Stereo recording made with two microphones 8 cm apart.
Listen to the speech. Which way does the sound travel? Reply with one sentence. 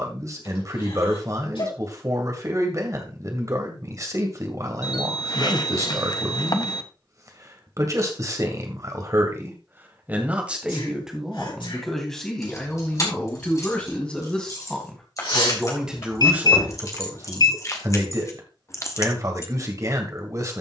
You can hear the speech move from right to left and back again.